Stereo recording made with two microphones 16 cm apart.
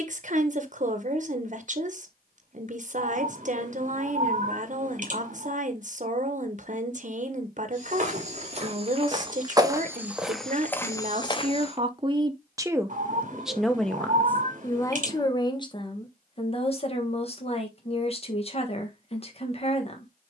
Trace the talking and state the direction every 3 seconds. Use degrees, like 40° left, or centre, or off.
50° right, 50° right, 50° right, 50° right, centre, 30° left, 40° left.